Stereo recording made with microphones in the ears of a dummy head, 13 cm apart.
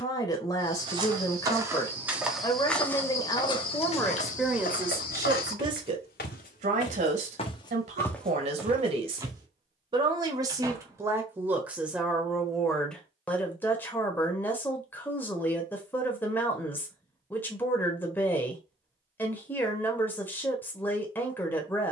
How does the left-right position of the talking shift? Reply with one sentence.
You can hear the talking move from left to right and back again.